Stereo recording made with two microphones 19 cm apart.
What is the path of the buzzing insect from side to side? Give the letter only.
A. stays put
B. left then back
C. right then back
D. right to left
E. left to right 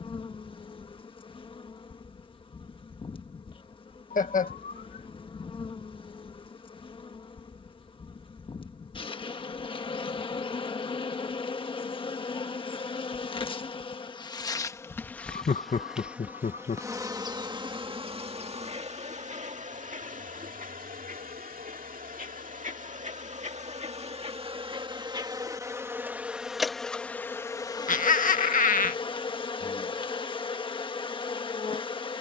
C.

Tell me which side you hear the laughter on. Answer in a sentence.
You can hear the laughter on the left.